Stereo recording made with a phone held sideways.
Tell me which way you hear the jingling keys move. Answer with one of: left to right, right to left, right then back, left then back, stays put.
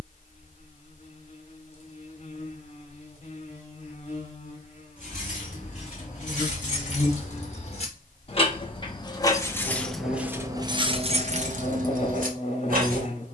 left to right.